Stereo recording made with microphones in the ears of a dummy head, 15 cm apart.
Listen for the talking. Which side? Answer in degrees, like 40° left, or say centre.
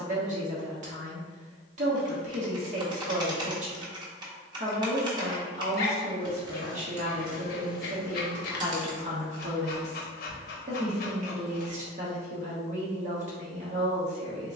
40° right.